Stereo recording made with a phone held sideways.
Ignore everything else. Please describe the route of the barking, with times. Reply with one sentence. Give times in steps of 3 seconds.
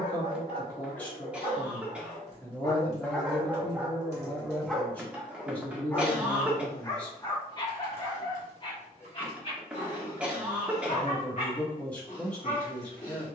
In this clip you hear the barking on the left from 0 s, in the centre from 3 s and on the left from 6 s.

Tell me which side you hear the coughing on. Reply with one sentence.
You can hear the coughing in the centre.